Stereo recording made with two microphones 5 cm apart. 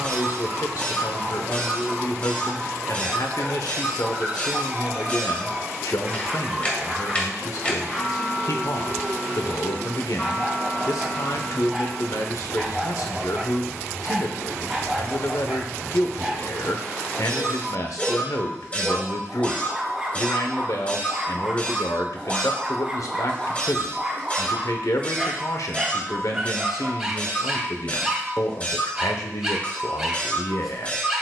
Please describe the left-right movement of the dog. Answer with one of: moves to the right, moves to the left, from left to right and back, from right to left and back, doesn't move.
doesn't move.